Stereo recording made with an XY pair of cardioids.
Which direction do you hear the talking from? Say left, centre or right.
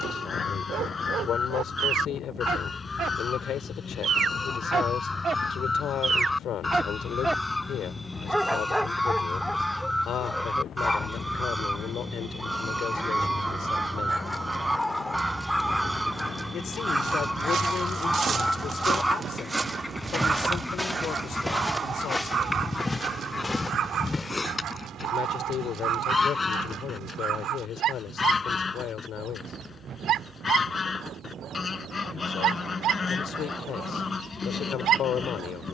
left.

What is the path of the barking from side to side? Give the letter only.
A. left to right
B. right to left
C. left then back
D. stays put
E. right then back
C.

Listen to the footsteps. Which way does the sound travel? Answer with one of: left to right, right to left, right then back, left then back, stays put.
right to left.